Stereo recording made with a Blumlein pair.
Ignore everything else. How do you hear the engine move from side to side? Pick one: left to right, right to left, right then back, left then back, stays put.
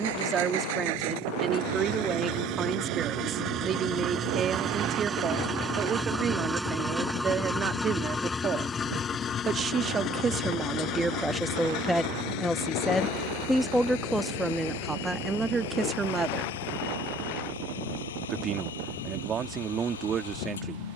right to left.